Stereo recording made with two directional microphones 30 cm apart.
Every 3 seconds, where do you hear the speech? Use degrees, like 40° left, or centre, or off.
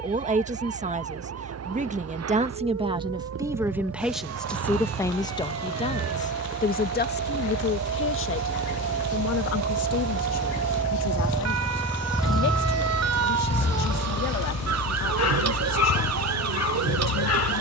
20° right, centre, 40° left, 60° left, 60° left, 60° left.